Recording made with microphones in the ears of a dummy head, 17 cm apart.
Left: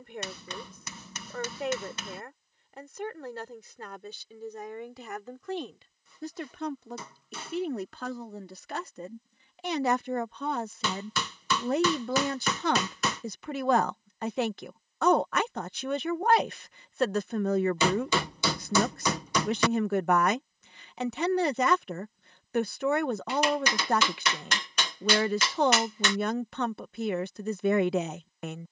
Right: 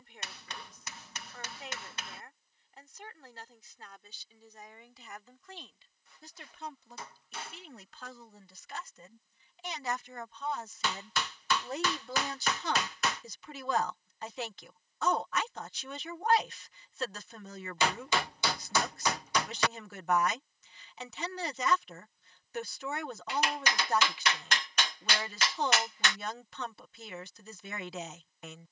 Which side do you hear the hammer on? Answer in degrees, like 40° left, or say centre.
80° left.